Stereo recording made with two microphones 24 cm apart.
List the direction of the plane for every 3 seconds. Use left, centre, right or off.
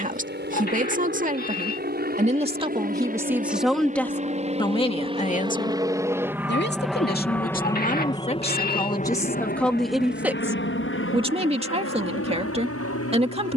right, right, centre, left, left.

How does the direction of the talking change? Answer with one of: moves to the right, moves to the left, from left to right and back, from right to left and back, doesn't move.
from right to left and back.